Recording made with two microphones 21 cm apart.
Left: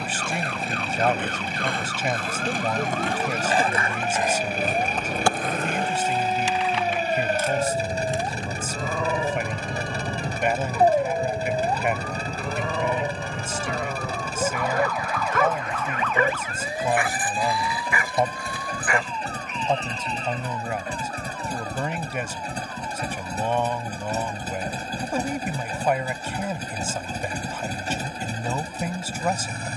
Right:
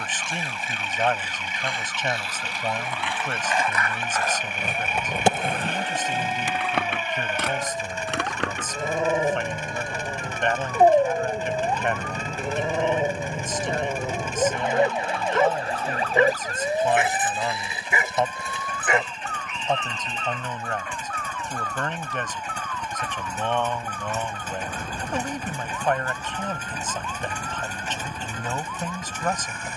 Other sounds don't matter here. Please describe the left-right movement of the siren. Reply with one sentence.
In this clip you hear the siren move from left to right.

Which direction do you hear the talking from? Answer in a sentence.
You can hear the talking in the centre.